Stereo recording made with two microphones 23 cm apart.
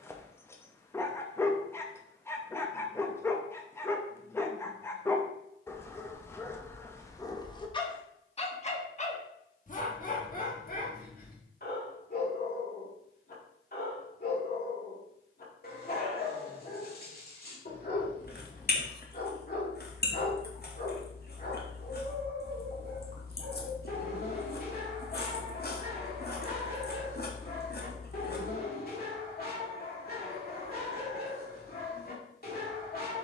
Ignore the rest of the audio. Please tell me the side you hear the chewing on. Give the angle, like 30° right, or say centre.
40° left.